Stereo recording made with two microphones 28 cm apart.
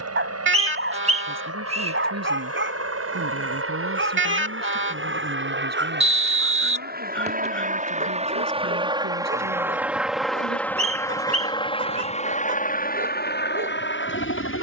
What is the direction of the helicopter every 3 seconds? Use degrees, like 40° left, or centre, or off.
60° right, 50° right, 30° right, centre, 30° left.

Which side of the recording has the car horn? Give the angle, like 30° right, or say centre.
40° right.